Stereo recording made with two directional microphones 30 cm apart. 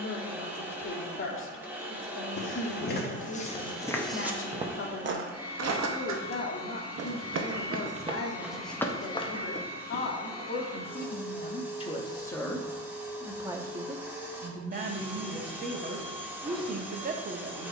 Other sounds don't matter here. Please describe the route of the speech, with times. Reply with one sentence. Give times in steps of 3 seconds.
You can hear the speech on the left from 0 s, in the centre from 12 s and on the right from 15 s.